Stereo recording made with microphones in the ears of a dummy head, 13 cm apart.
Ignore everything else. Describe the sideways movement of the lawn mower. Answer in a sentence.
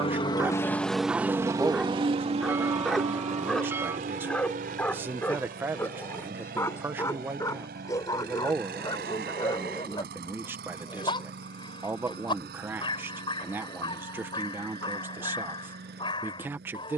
In this clip you hear the lawn mower move to the right.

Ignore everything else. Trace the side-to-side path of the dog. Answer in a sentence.
In this clip you hear the dog move to the left.